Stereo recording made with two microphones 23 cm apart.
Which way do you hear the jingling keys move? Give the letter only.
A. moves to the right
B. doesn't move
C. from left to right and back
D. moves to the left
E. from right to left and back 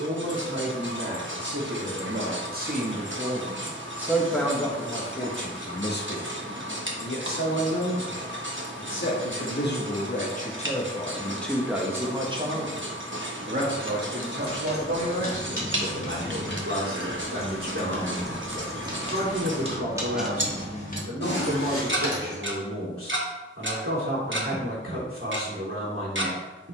C.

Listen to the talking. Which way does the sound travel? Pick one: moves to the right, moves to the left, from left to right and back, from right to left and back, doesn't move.
from right to left and back.